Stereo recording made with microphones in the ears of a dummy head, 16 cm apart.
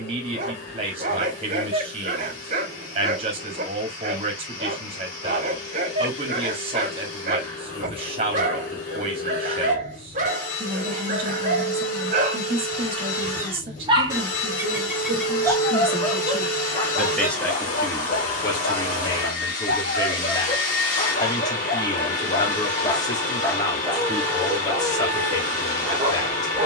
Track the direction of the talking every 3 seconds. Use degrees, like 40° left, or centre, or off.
30° right, 30° right, 30° right, 30° right, 30° right, centre, 20° left, 20° left, 20° left.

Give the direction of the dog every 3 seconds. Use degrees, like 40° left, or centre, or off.
40° right, 40° right, 40° right, 40° right, 30° right, 30° left, 50° left, 30° left, 10° right.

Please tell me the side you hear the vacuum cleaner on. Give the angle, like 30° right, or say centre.
40° left.